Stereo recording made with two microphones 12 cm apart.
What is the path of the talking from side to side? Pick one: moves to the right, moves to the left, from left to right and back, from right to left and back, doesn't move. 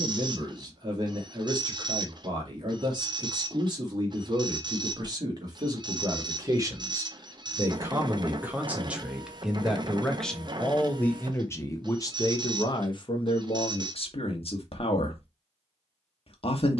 moves to the left.